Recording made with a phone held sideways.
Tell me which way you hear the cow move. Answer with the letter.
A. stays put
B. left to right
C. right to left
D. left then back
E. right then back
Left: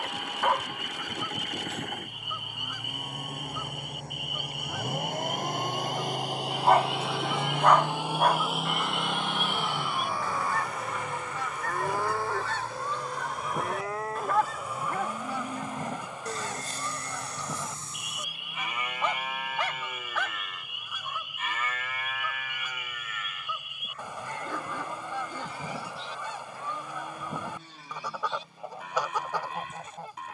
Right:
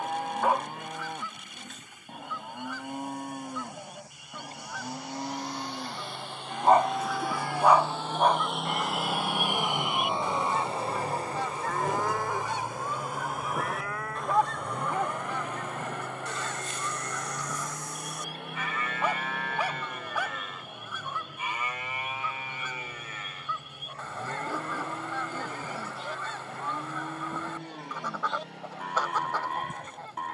D.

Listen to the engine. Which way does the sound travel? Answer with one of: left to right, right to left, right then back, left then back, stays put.
left to right.